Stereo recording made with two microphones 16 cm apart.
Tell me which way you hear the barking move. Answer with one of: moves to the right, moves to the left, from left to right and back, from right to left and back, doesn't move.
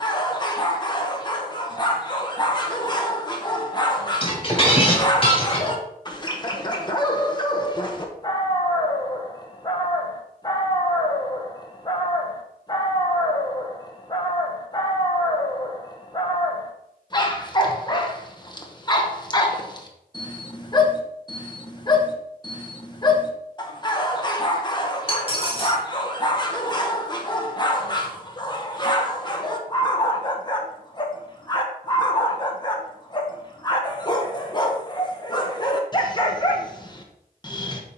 doesn't move.